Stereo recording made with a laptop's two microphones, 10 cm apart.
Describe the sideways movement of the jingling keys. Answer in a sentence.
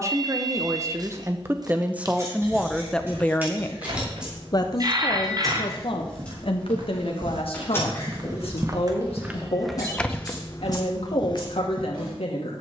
In this clip you hear the jingling keys move from right to left.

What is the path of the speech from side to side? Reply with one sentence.
You can hear the speech move to the left.